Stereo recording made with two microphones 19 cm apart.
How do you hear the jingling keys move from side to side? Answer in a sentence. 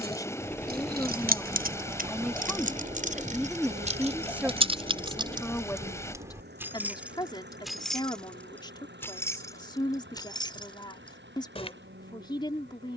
You can hear the jingling keys travel towards the left.